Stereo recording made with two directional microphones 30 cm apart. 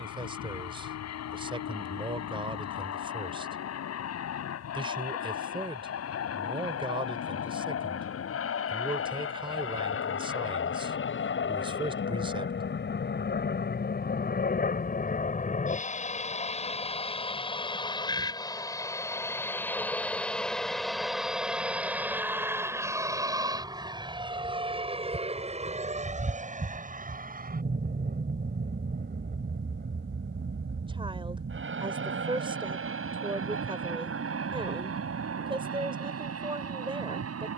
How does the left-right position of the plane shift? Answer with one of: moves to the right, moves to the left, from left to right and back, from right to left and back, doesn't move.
moves to the right.